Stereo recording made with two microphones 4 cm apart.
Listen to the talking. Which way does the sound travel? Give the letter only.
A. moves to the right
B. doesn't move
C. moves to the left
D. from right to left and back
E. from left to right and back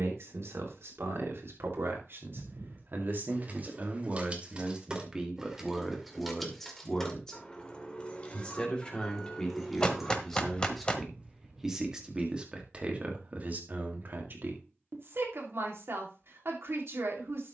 D.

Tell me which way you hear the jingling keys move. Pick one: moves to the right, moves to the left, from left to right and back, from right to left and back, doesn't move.
from right to left and back.